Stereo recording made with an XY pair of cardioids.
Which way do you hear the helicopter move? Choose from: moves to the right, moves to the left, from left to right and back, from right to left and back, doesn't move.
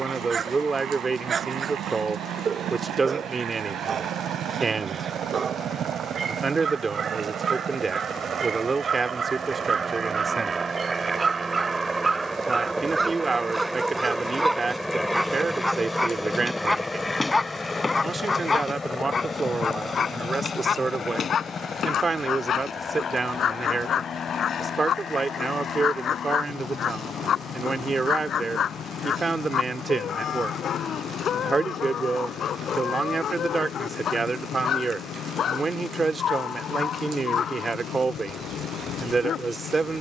moves to the left.